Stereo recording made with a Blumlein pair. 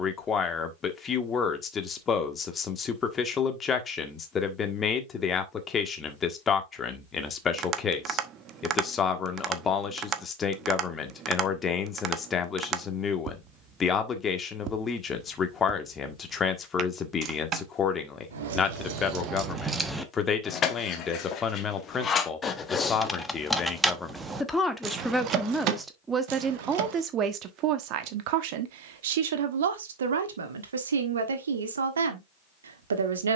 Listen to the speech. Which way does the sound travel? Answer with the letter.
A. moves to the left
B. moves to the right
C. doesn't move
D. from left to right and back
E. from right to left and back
B.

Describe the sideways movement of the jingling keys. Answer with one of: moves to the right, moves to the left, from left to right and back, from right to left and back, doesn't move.
from right to left and back.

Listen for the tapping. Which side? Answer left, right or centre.
right.